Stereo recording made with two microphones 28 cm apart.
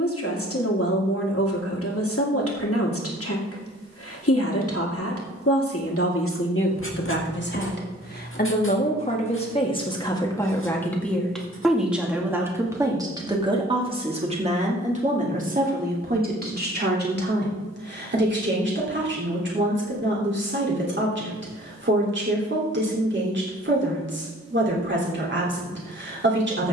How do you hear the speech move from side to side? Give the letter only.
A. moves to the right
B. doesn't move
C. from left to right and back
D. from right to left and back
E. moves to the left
A.